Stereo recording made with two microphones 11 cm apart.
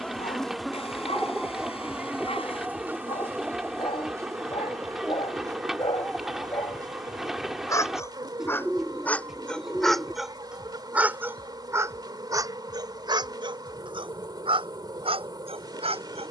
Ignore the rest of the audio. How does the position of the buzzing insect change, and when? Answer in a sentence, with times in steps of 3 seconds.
You can hear the buzzing insect in the centre from 0 s and on the right from 3 s.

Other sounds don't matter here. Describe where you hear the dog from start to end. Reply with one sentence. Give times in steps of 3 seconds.
You can hear the dog on the left from 0 s, in the centre from 9 s and on the right from 12 s.